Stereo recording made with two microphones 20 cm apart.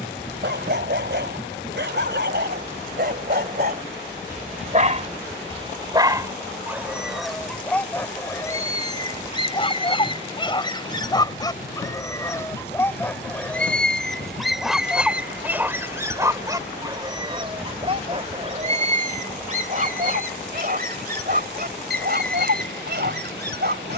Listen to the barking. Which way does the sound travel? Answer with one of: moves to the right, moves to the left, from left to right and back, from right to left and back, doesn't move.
from right to left and back.